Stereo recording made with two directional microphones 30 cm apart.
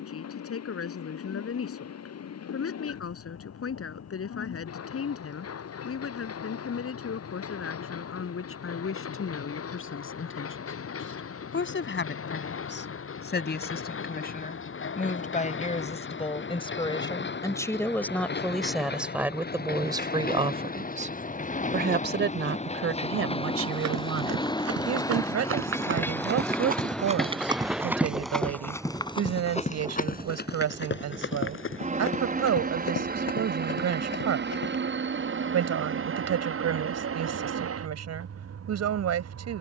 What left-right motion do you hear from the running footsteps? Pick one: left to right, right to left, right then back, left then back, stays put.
right to left.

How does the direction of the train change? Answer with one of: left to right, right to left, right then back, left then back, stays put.
left to right.